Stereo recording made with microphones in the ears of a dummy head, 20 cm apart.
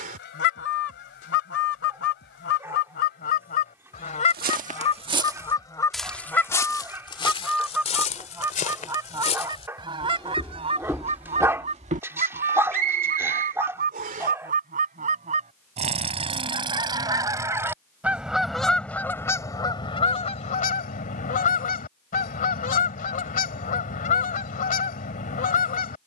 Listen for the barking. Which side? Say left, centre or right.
centre.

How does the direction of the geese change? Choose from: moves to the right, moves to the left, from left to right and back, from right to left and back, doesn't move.
from left to right and back.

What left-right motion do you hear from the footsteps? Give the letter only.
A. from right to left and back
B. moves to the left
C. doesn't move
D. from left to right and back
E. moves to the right
A.